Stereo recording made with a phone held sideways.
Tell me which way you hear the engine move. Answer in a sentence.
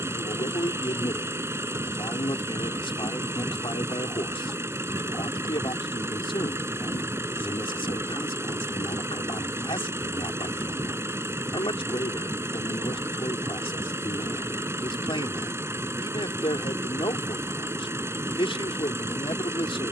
In this clip you hear the engine stay in one place.